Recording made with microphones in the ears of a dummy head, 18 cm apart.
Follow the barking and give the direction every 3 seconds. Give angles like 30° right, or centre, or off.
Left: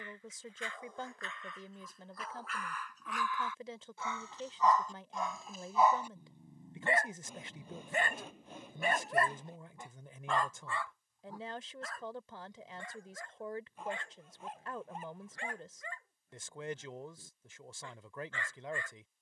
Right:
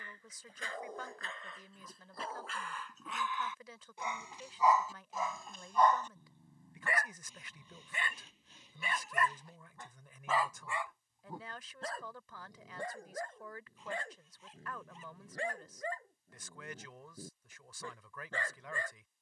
30° right, 10° right, 30° left, centre, 40° right, 40° right, 40° right.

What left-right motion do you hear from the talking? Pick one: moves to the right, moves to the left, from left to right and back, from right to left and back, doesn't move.
doesn't move.